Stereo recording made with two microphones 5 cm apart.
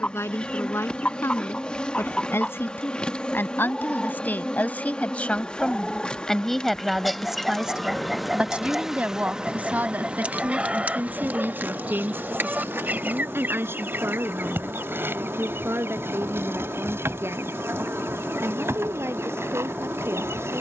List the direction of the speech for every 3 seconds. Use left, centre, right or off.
left, left, centre, right, right, right, right.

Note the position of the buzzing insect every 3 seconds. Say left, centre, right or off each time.
left, left, centre, right, right, right, right.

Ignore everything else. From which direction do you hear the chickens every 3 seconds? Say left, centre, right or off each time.
left, centre, centre, right, right, right, right.